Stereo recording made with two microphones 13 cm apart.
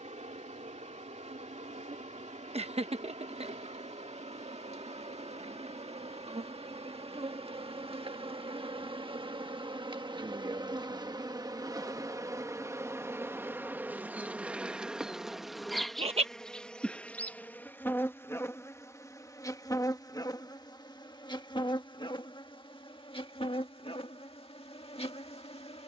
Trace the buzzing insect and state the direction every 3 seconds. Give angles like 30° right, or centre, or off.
60° right, 60° right, 50° right, 40° right, 20° right, 10° left, 30° left, 40° left, 50° left.